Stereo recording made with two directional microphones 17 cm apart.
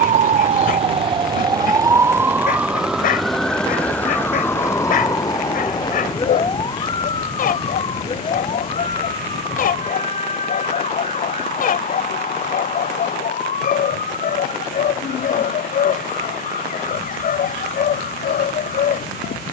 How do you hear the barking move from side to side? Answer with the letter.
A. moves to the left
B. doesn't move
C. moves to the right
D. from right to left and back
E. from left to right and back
B.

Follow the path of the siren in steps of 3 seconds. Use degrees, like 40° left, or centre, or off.
20° right, 10° left, 30° left, 40° left, 50° left, 50° left, 50° left.